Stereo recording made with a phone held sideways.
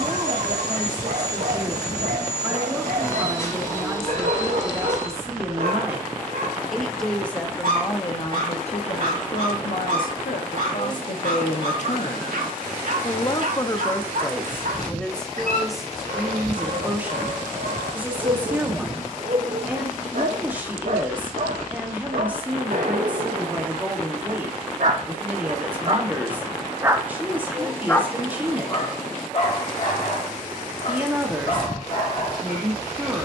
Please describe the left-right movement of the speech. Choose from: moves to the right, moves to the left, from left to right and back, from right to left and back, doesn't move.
from right to left and back.